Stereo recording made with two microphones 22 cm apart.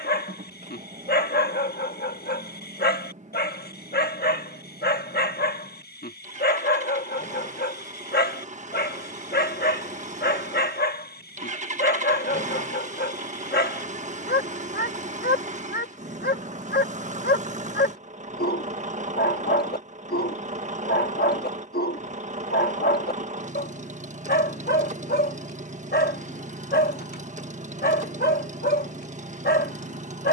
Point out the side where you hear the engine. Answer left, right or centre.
right.